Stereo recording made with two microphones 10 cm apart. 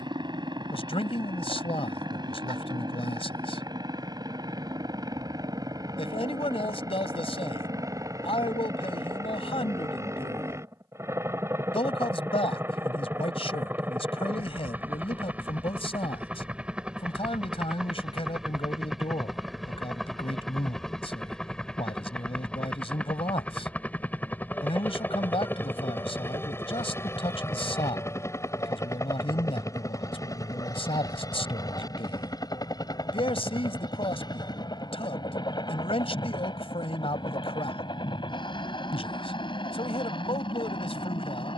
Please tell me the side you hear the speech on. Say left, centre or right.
left.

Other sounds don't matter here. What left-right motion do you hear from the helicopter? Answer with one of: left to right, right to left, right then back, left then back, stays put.
right to left.